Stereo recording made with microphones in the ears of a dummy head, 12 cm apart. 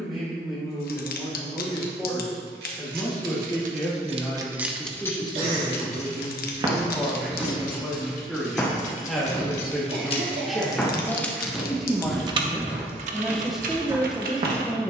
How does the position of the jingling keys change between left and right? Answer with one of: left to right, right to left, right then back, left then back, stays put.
left then back.